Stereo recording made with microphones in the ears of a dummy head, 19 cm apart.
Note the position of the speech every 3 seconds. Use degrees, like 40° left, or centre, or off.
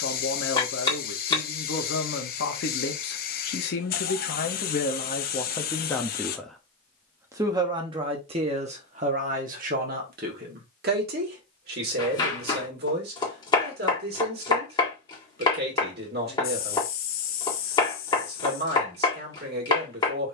60° left, 40° left, 20° right, 50° right, 50° right, 50° right, 50° right.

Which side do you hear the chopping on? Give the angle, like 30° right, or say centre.
20° left.